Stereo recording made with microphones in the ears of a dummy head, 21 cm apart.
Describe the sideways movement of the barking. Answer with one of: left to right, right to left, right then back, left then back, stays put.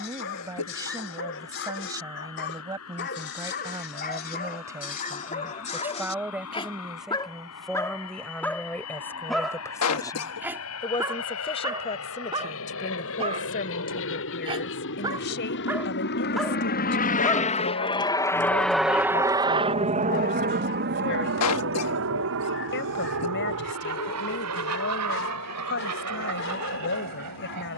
right then back.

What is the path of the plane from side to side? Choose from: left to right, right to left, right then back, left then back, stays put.
left to right.